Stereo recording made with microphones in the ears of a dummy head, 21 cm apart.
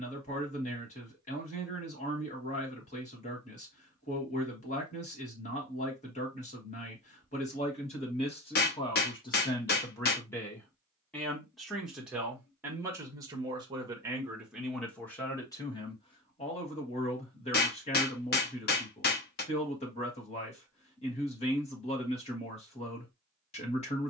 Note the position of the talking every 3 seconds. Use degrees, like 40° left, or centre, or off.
30° left, 30° left, 30° left, 10° left, 10° right, 20° left, 30° left, 30° left.